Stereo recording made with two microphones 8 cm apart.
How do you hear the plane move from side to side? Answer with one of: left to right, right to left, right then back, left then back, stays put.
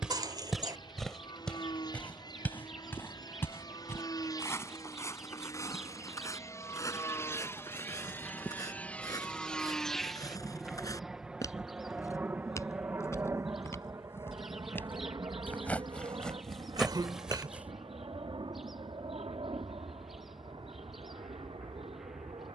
left to right.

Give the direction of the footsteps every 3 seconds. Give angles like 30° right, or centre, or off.
10° left, 30° left, 40° left, 40° left, 30° left, centre, off, off.